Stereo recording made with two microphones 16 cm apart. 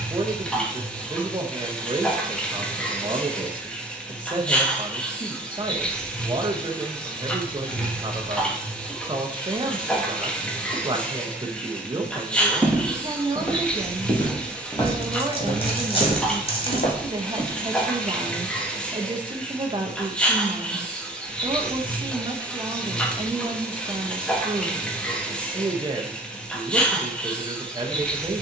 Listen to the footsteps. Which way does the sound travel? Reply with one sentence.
In this clip you hear the footsteps move from right to left.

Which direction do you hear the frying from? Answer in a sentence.
In this clip you hear the frying in the centre.